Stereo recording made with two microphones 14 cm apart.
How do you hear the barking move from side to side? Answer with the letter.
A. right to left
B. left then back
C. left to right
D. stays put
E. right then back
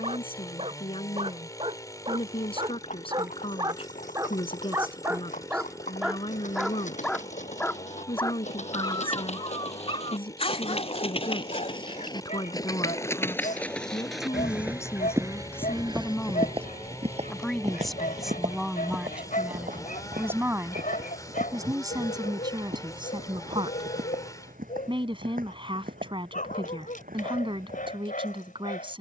A.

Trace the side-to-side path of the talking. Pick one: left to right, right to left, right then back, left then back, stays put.
left to right.